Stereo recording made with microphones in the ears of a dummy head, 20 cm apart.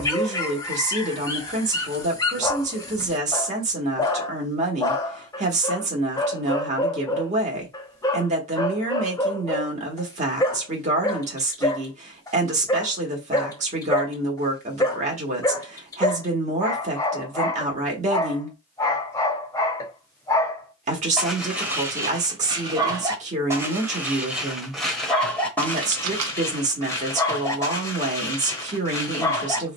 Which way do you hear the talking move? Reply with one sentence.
You can hear the talking stay put.